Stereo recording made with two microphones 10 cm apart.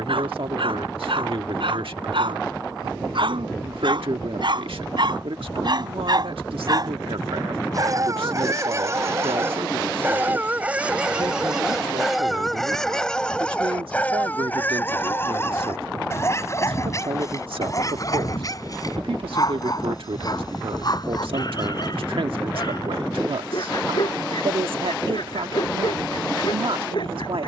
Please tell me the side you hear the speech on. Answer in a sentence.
In this clip you hear the speech on the right.